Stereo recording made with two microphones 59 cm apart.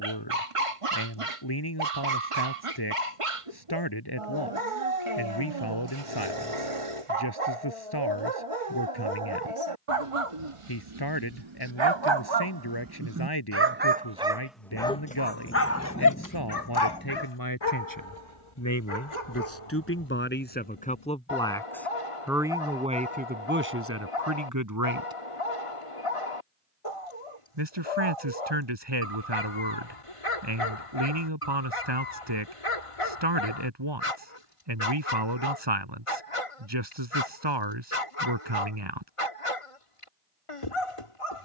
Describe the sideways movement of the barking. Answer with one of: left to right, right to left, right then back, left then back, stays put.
right to left.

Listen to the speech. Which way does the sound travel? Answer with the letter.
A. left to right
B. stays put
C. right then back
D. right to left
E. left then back
A.